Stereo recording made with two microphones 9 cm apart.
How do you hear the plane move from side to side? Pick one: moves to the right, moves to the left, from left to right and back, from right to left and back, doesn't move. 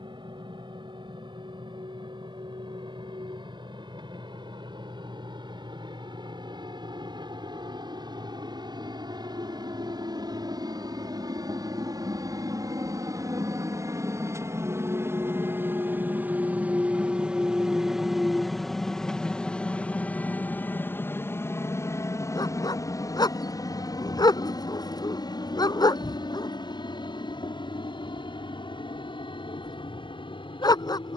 moves to the left.